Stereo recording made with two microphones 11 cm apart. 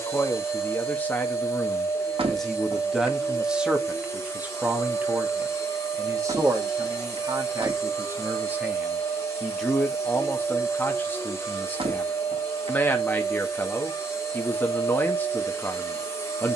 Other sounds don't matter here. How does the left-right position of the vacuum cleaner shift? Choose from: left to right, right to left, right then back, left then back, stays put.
stays put.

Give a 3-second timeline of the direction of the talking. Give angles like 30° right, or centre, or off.
10° left, 10° right, 30° right, 20° left, 20° left, 20° left.